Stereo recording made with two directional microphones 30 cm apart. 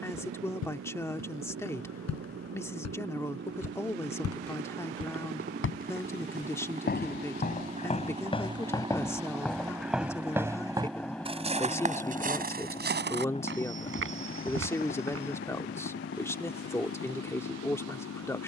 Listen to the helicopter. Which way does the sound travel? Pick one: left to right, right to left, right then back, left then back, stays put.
right to left.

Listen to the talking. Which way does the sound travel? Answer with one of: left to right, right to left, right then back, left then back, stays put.
stays put.